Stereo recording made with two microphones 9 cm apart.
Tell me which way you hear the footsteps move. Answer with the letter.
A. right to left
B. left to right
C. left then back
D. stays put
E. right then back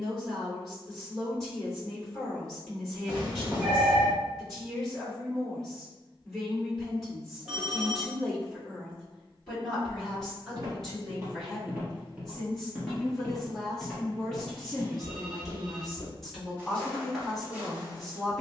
C.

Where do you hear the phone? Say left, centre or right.
centre.